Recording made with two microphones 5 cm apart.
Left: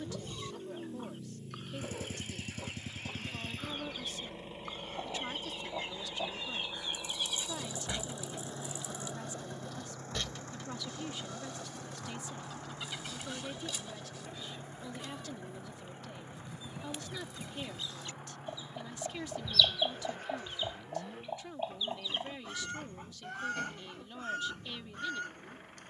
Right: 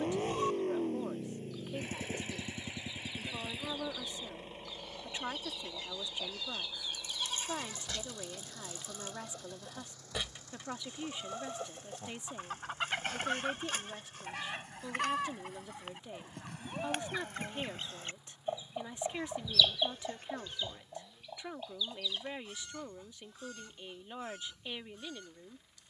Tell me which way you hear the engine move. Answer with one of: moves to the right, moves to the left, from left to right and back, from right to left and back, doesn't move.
moves to the left.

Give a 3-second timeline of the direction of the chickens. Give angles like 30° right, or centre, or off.
60° left, 50° left, 30° left, 10° right, 50° right, 60° right, centre, 40° left, 60° left.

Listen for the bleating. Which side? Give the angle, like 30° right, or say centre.
40° right.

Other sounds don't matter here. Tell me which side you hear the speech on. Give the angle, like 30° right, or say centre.
20° right.